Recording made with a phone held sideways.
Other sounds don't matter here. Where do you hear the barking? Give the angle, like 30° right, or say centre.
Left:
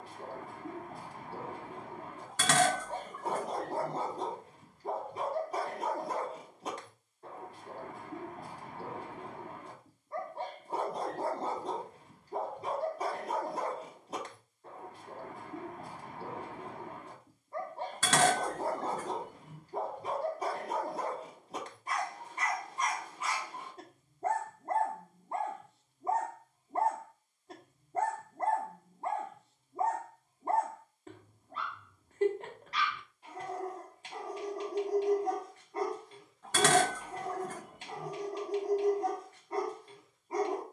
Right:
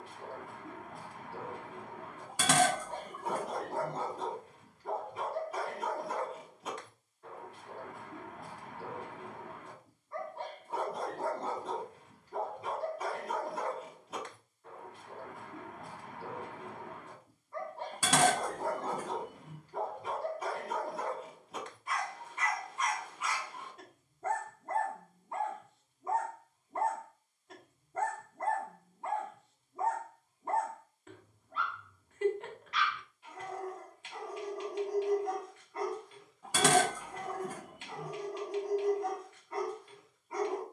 40° left.